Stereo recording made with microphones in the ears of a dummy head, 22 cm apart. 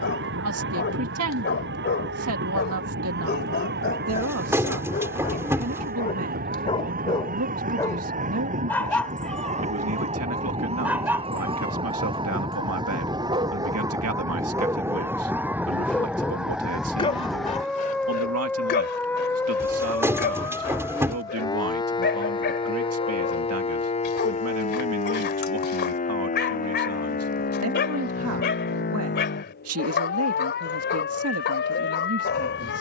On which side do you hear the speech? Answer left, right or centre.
right.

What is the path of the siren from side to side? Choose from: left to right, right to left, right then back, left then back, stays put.
right to left.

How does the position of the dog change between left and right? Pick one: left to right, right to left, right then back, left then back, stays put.
right then back.